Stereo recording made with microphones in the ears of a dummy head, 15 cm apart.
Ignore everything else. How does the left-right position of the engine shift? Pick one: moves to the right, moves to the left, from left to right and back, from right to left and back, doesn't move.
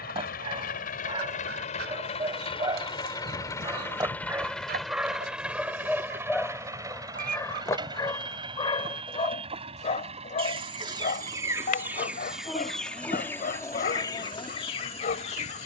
moves to the right.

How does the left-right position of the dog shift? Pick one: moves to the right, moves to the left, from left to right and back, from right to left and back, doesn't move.
moves to the left.